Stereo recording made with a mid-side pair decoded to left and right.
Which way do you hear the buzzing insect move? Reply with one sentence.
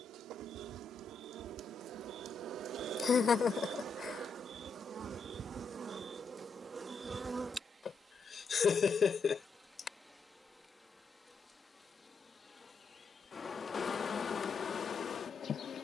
In this clip you hear the buzzing insect go from the right side to the left.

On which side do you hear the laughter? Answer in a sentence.
You can hear the laughter on the left.